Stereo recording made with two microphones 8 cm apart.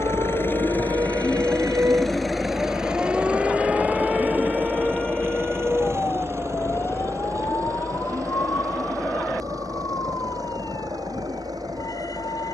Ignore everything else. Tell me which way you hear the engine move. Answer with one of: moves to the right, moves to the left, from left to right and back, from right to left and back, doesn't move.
moves to the right.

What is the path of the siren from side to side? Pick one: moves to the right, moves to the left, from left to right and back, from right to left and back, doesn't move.
moves to the left.